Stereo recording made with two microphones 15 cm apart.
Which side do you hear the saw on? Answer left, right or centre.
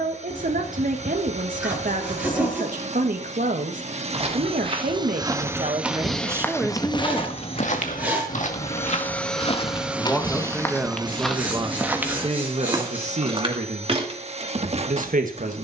centre.